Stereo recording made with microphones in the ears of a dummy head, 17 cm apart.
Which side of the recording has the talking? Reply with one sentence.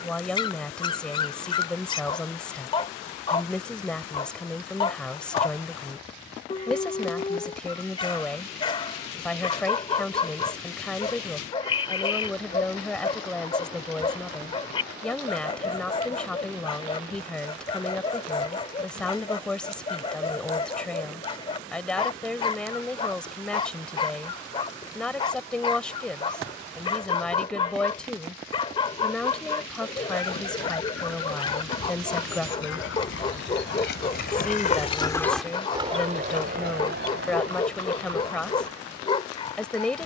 In this clip you hear the talking in the centre.